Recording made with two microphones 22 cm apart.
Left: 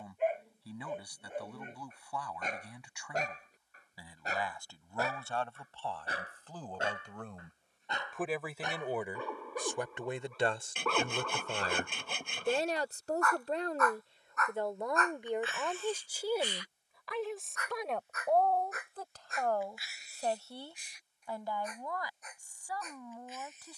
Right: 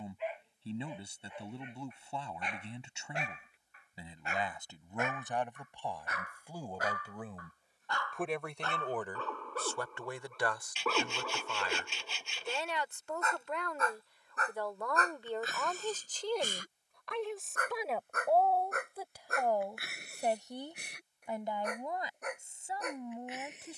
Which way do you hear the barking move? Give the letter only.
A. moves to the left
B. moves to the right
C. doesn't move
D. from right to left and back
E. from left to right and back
B.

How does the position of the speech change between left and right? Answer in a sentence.
You can hear the speech go left and come back.